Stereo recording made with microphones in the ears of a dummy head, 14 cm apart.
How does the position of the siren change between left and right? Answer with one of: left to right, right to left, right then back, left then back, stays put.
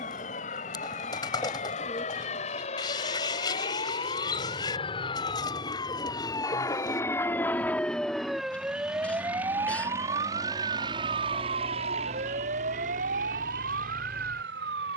left to right.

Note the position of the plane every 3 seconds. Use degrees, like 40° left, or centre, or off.
50° left, 40° left, 10° left, 20° right, 50° right.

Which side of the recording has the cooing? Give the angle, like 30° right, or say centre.
30° left.